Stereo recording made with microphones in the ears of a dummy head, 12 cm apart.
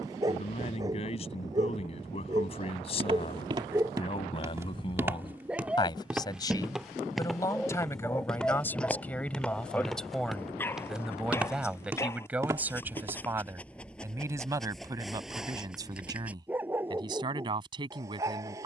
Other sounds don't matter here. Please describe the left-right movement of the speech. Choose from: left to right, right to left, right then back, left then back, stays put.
left to right.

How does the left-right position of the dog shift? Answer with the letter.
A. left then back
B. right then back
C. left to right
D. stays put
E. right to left
A.